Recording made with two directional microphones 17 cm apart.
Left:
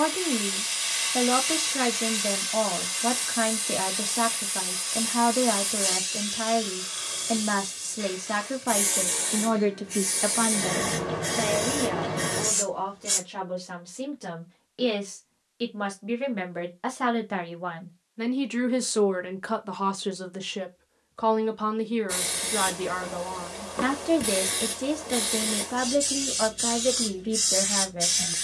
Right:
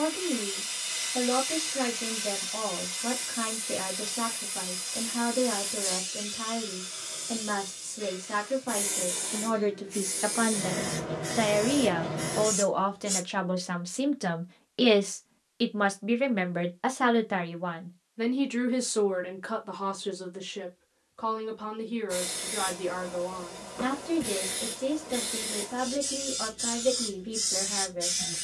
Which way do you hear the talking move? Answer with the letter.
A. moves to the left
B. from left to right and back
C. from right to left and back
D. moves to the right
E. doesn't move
B.